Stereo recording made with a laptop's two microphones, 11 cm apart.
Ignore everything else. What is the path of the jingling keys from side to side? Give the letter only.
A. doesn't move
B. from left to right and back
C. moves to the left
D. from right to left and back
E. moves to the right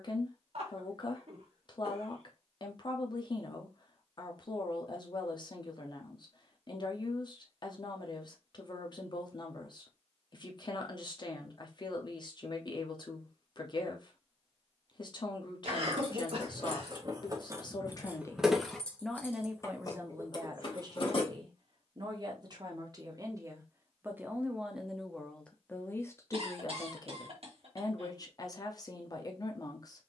C.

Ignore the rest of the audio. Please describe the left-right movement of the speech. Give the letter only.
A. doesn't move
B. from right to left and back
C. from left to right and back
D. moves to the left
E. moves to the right
C.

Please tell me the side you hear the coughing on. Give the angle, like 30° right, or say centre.
60° right.